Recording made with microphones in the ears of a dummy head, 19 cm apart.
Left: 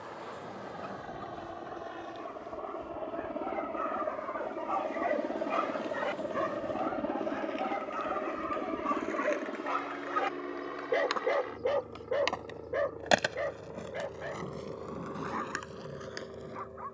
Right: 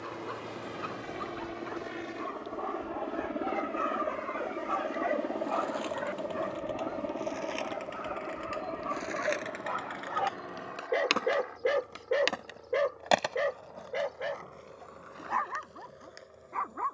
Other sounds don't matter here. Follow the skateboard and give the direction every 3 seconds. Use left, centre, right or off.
off, right, right, right, left, left.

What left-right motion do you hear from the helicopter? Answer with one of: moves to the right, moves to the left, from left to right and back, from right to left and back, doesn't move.
moves to the left.